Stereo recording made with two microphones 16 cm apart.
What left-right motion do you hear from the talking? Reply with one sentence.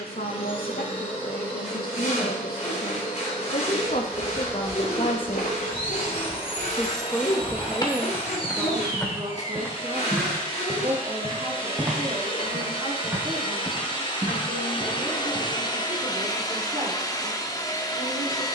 In this clip you hear the talking move from left to right.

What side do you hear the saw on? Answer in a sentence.
You can hear the saw on the left.